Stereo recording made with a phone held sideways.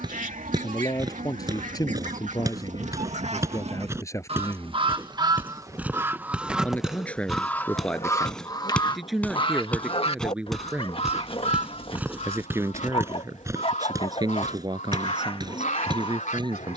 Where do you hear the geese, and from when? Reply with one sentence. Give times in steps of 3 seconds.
In this clip you hear the geese on the right from 0 s, in the centre from 6 s and on the left from 9 s.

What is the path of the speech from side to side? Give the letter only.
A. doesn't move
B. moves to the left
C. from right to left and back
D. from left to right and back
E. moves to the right
E.